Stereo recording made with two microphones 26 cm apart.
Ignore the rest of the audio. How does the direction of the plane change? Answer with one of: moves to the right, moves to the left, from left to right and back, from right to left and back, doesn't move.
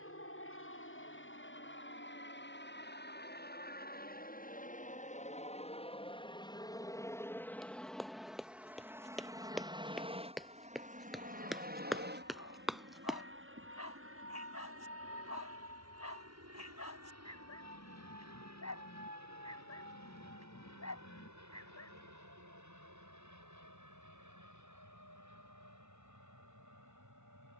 moves to the right.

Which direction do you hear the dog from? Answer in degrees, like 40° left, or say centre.
70° left.